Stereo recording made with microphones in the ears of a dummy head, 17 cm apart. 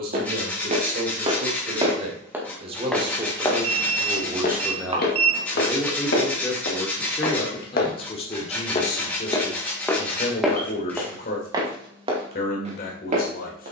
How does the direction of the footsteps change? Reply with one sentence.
In this clip you hear the footsteps move from right to left and back again.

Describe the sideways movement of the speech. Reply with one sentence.
In this clip you hear the speech move from right to left.